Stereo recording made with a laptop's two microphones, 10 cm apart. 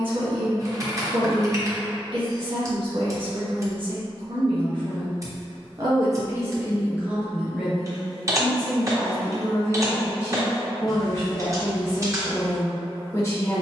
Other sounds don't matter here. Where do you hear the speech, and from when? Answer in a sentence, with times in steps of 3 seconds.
In this clip you hear the speech on the right from 0 s, in the centre from 6 s and on the left from 9 s.